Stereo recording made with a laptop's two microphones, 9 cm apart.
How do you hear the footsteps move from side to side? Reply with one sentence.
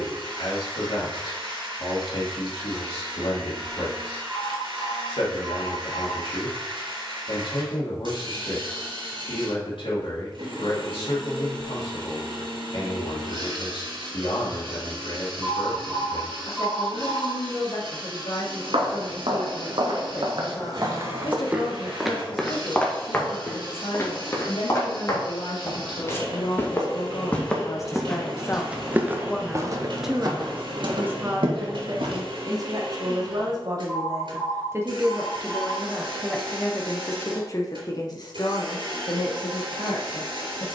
You can hear the footsteps move from right to left and back again.